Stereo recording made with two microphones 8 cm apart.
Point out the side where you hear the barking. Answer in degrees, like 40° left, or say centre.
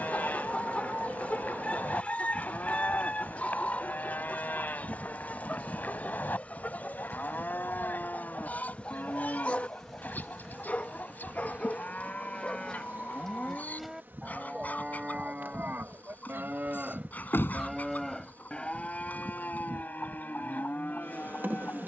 20° left.